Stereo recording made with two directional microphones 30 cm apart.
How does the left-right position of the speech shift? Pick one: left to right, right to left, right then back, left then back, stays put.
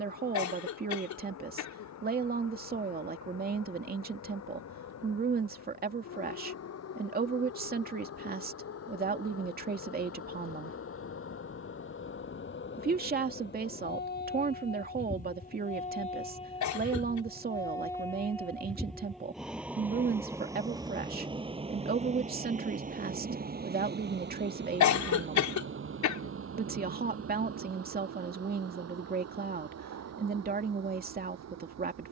stays put.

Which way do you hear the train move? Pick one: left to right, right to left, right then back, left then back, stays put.
left to right.